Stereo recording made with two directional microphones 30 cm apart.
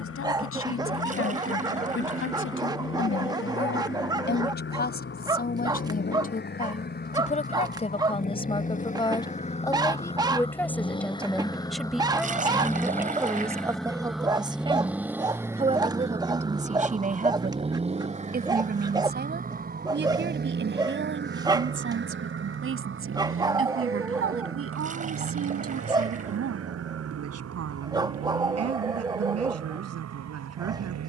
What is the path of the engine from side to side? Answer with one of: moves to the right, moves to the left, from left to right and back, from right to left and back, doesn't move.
moves to the right.